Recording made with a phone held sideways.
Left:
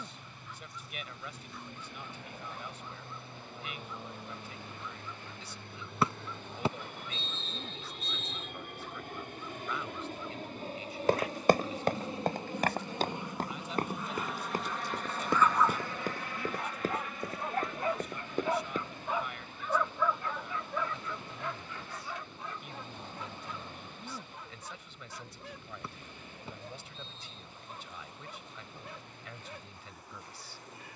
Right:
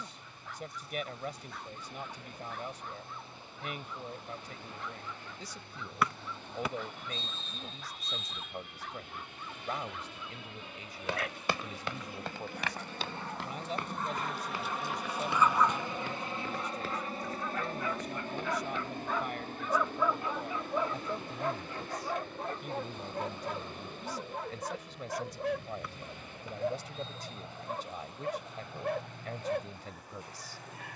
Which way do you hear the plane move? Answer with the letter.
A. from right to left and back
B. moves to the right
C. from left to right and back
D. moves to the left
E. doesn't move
B.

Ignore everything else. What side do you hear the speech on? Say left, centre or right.
right.